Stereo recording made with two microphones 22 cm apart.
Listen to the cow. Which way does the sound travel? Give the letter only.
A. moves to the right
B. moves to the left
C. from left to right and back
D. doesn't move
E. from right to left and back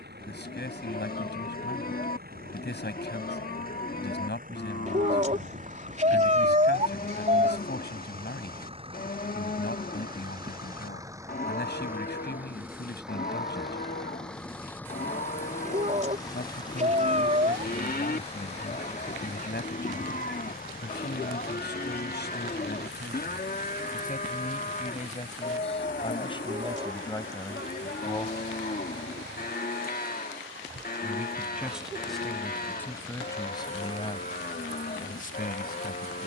D.